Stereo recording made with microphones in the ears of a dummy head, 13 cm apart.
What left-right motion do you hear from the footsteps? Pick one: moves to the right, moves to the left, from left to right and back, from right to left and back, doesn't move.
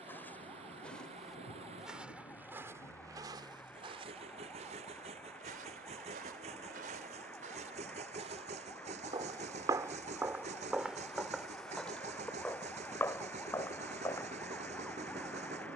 from left to right and back.